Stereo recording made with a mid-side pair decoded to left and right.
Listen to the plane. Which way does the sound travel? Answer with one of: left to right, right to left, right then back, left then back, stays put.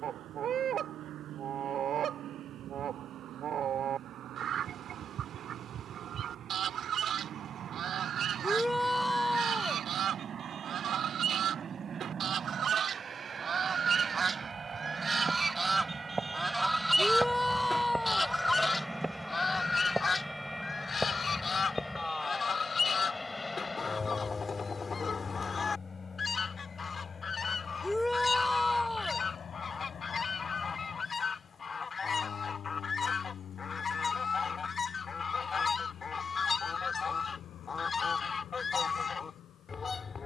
right to left.